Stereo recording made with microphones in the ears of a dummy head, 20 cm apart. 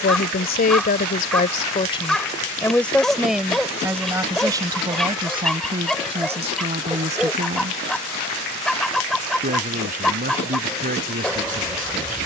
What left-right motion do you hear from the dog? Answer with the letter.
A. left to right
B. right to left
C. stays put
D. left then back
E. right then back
C.